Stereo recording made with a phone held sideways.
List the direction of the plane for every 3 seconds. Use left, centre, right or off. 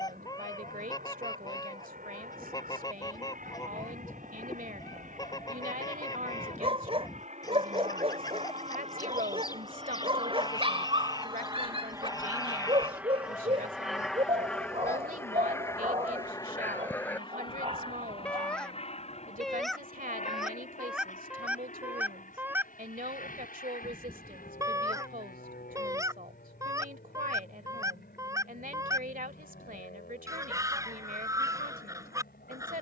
right, right, right, right, centre, left, left, left, left, left, left.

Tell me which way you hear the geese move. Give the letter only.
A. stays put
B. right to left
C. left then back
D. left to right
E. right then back
D.